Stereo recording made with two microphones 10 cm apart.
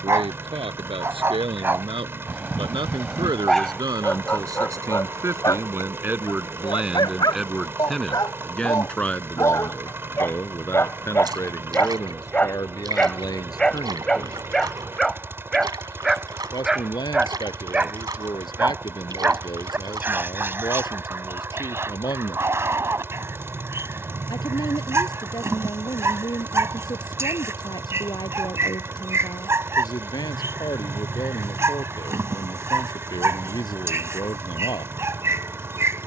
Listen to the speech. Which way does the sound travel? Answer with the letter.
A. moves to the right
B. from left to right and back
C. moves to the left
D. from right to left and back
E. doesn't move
C.